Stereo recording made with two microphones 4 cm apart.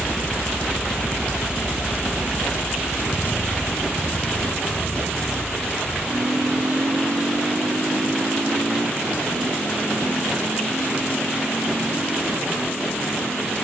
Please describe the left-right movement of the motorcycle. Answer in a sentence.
In this clip you hear the motorcycle move from left to right.